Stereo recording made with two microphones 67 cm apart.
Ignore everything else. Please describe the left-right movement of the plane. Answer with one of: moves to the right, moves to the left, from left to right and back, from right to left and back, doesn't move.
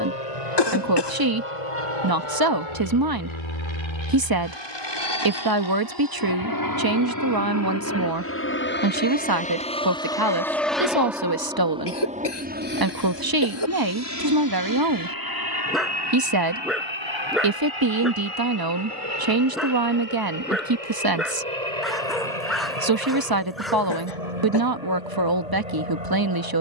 moves to the right.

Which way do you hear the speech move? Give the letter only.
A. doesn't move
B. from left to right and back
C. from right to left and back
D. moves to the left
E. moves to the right
A.